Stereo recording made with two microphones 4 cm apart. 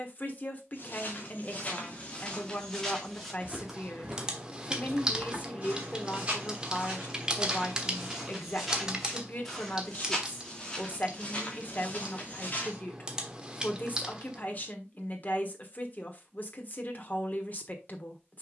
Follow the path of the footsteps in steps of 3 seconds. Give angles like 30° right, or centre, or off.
30° left, 10° right, 10° right, 20° left, 40° left, off.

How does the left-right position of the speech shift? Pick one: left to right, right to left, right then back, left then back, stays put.
stays put.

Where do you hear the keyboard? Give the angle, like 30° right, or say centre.
20° right.